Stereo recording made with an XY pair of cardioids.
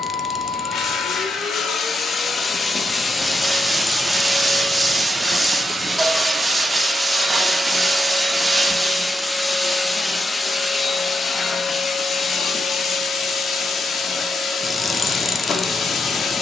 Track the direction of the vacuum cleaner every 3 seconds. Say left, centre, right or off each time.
left, centre, centre, left, left, left.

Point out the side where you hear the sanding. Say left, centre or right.
centre.